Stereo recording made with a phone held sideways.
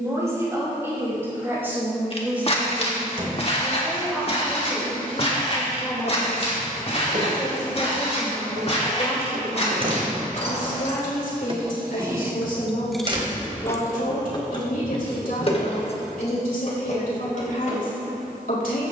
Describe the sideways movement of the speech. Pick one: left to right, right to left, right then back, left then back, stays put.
right to left.